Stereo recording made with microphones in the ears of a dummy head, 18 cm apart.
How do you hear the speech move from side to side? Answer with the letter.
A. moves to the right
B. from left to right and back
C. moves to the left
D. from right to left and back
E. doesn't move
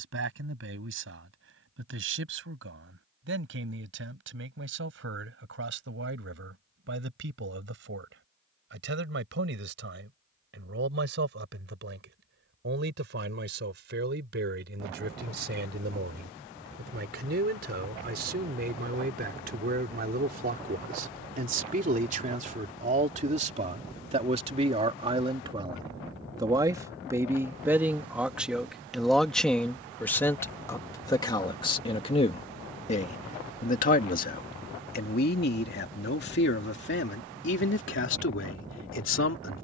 C.